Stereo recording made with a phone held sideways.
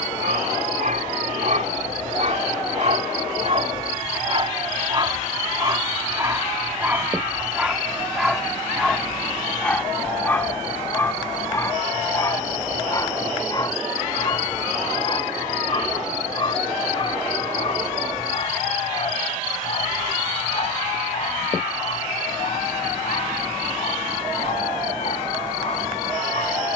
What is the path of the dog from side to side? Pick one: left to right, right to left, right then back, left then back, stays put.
right to left.